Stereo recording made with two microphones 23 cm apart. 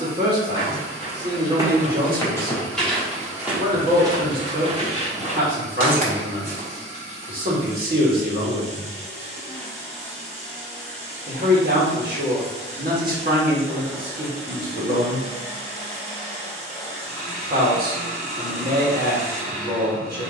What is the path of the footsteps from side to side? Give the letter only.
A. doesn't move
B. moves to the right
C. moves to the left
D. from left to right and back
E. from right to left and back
E.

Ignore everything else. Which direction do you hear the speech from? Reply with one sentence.
In this clip you hear the speech on the right.